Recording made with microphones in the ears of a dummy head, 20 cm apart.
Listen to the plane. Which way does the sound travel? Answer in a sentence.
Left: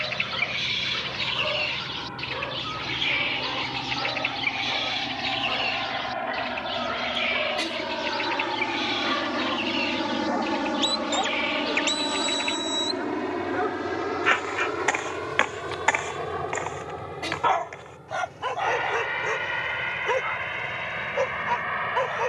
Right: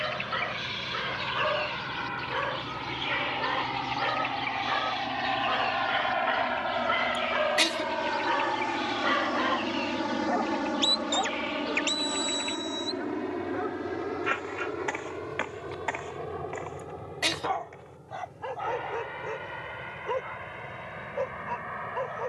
You can hear the plane go from the right side to the left.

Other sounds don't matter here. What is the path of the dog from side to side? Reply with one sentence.
You can hear the dog go from the right side to the left.